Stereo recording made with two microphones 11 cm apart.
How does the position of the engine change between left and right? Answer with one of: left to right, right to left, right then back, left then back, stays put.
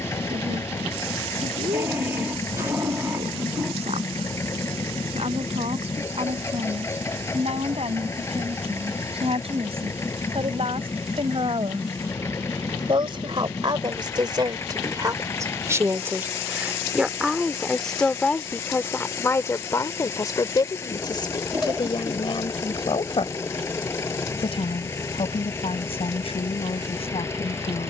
stays put.